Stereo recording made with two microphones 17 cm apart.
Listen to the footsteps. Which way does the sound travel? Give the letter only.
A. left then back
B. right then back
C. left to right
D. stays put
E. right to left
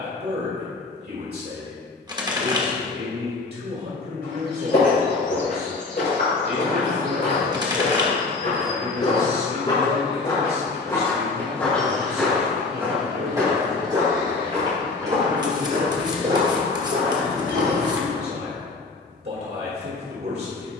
C.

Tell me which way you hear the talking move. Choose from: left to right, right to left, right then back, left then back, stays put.
stays put.